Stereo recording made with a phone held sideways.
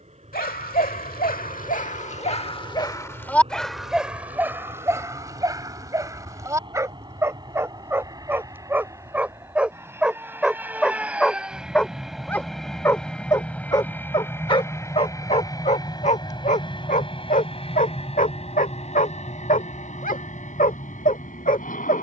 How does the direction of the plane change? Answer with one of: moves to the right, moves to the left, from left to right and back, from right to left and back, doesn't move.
moves to the left.